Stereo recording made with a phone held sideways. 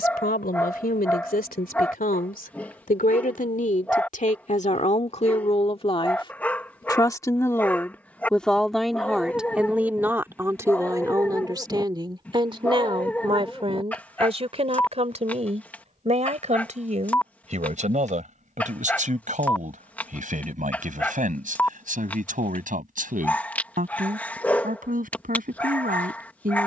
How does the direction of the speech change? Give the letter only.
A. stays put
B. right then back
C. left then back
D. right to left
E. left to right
E.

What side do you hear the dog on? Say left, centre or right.
centre.